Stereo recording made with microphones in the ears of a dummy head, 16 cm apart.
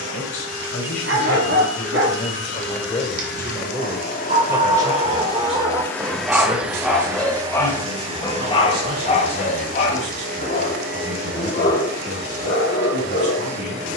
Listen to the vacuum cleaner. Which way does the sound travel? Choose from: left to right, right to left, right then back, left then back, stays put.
left to right.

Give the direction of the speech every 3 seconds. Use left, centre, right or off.
left, centre, right, right, right.